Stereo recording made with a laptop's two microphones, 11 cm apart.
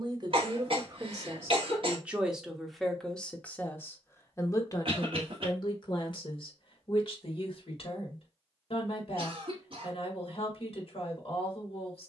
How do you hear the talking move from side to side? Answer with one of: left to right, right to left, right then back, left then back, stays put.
right to left.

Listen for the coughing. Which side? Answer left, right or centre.
right.